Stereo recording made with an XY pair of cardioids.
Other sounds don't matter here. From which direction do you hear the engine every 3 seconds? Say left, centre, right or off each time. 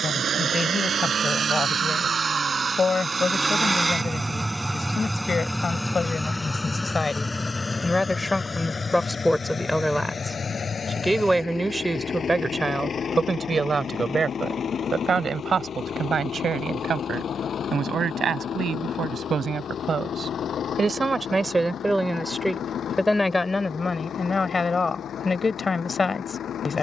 right, centre, left, left, left, left, left, left, left.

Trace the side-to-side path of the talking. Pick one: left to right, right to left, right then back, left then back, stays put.
right then back.